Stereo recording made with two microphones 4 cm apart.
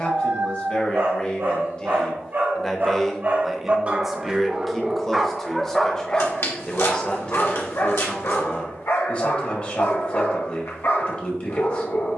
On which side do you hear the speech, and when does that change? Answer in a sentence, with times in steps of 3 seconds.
In this clip you hear the speech on the left from 0 s, in the centre from 3 s and on the left from 6 s.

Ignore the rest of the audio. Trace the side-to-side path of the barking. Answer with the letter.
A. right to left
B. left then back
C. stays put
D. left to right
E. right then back
A.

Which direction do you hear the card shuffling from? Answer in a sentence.
You can hear the card shuffling on the left.